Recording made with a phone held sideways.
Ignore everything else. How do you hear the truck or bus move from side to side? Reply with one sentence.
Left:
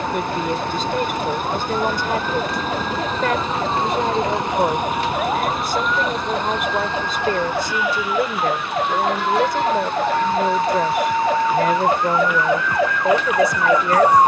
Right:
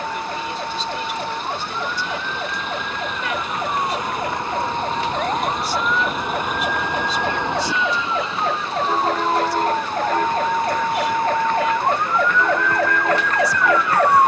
In this clip you hear the truck or bus move from left to right.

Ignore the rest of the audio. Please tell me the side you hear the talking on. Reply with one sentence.
In this clip you hear the talking on the left.